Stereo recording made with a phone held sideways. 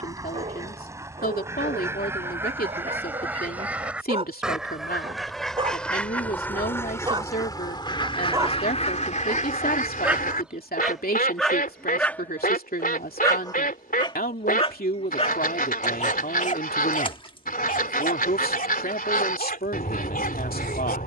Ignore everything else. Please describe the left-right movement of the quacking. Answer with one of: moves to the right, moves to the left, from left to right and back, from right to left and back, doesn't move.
moves to the left.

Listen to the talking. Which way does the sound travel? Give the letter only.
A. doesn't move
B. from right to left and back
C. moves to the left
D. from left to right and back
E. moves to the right
A.